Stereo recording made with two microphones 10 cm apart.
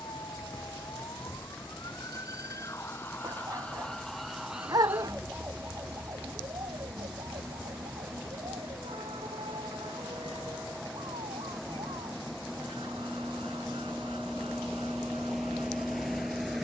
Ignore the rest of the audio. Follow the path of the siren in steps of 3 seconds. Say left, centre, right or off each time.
left, centre, right, right, right, right.